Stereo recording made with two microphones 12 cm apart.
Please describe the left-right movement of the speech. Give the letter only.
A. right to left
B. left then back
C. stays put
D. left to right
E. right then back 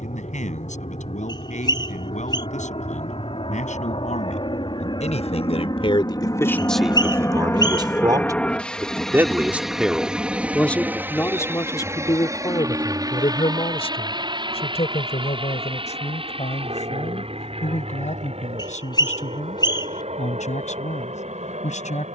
E.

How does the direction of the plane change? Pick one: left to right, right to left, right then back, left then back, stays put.
left to right.